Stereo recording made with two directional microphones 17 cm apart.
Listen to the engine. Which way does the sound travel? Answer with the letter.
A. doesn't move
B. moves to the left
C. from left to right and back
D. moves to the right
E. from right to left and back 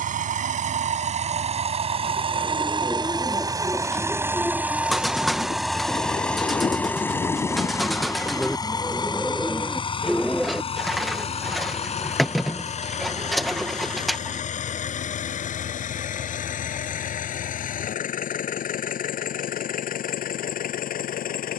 B.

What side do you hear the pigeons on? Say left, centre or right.
centre.